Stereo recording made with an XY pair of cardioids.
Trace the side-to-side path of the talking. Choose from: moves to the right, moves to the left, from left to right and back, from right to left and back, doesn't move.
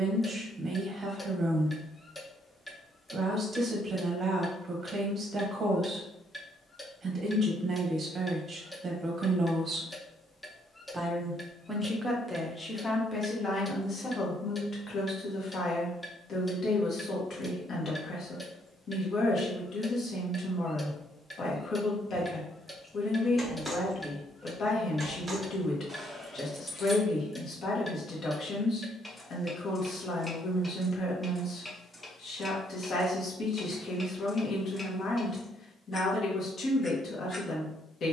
moves to the left.